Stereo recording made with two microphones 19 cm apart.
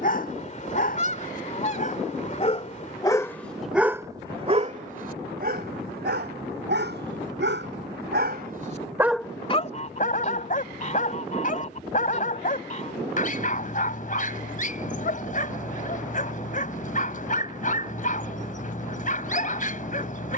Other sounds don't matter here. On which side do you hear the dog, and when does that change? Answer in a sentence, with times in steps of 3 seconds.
You can hear the dog on the left from 0 s, on the right from 3 s and on the left from 9 s.